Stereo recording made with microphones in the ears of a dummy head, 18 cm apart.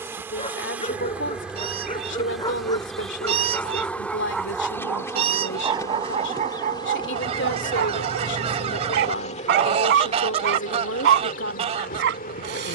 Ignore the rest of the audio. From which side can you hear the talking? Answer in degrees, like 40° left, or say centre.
60° left.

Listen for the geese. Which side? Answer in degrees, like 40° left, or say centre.
30° right.